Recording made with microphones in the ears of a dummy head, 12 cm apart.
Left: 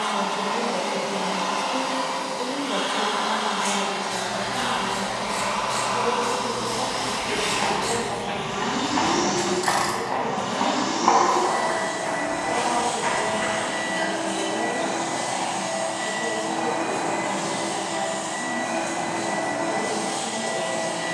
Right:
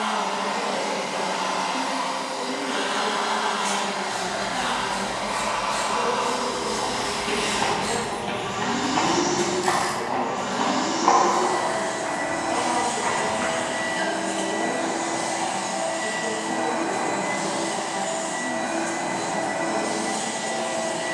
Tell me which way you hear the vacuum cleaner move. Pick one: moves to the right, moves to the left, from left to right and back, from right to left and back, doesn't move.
doesn't move.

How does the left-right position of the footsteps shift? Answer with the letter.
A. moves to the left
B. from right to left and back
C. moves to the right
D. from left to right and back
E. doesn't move
A.